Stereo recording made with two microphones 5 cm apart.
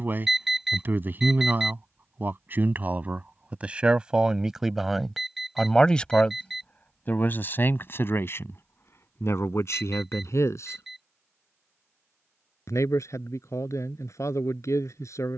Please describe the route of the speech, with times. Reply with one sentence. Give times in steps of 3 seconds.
In this clip you hear the speech on the right from 0 s, in the centre from 3 s and on the left from 6 s.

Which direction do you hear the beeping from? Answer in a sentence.
In this clip you hear the beeping in the centre.